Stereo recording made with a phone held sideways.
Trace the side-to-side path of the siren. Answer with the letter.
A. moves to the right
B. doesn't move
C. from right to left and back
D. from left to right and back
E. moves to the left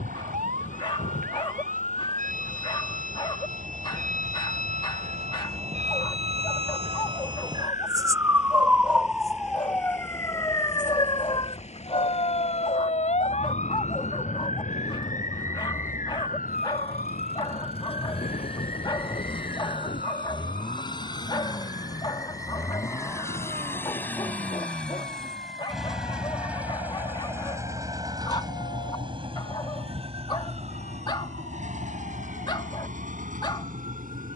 E.